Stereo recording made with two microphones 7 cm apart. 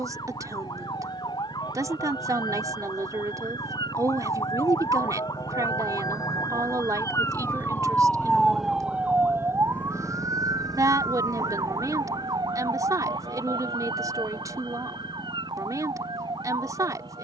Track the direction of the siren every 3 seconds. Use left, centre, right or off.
left, left, left, right, right, right.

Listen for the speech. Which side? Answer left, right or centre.
right.